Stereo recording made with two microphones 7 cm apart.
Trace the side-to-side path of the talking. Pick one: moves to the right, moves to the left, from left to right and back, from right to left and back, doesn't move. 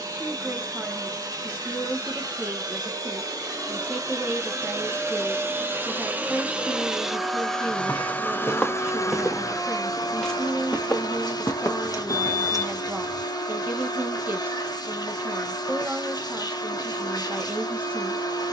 doesn't move.